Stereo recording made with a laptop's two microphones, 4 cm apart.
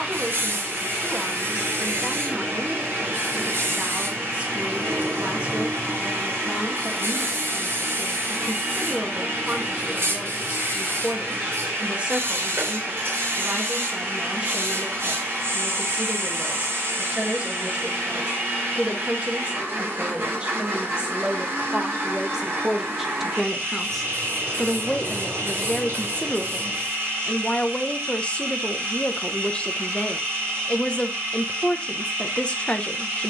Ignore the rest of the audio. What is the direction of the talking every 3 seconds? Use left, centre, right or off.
right, right, right, right, right, right, right, centre, left, left, left.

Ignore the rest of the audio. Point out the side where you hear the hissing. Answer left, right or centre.
right.